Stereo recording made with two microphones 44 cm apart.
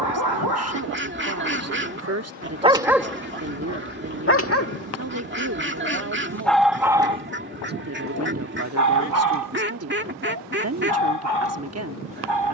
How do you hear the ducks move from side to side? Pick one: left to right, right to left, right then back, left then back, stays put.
stays put.